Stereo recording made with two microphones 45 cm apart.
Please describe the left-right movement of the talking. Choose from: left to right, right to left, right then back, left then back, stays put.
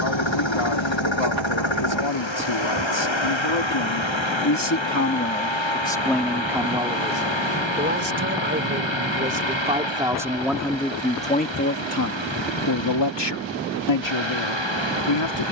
right then back.